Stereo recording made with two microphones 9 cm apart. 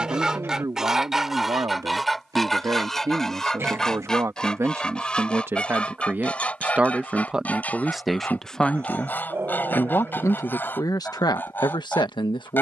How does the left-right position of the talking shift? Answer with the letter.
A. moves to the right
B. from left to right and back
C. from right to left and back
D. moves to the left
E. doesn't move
D.